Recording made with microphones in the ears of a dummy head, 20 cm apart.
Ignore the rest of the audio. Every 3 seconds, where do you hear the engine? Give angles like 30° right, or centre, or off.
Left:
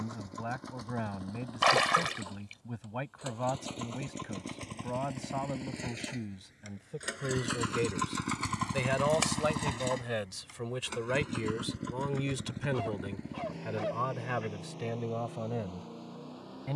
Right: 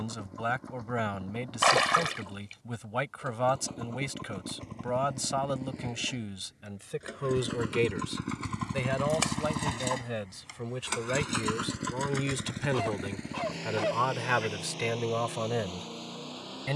80° left, 70° left, 50° left, 30° right, 70° right, 80° right.